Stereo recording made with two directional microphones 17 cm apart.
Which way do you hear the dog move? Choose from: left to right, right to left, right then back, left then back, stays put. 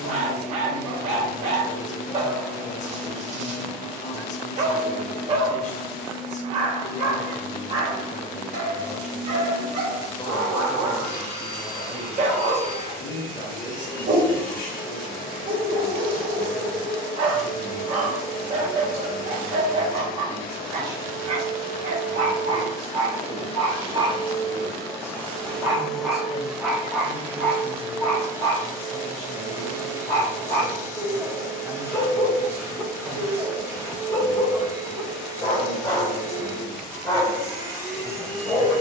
right to left.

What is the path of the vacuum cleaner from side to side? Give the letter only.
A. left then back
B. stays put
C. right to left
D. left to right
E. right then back
D.